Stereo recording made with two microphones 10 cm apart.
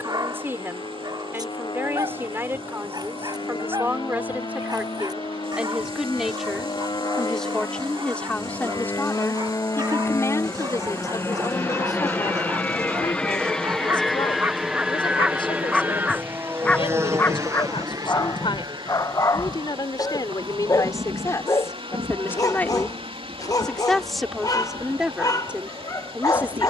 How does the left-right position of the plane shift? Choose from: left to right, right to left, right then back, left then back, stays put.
left to right.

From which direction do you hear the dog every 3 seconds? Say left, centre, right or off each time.
right, right, right, right, right, centre, left, left, left.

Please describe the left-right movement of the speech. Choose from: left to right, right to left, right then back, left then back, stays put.
left then back.